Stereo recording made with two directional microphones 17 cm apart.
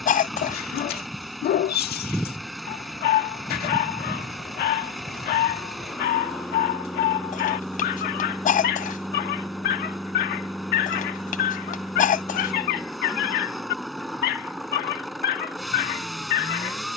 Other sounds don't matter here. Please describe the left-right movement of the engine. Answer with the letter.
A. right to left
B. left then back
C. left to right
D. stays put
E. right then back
D.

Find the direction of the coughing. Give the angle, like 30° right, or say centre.
50° left.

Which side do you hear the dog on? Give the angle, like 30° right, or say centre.
70° left.